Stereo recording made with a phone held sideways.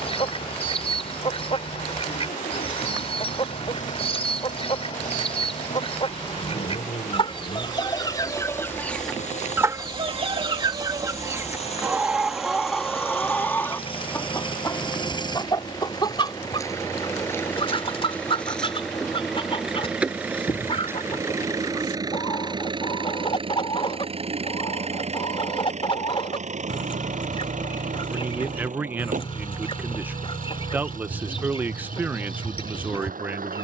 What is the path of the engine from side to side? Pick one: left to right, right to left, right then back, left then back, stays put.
left to right.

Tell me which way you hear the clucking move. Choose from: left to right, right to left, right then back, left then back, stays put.
right then back.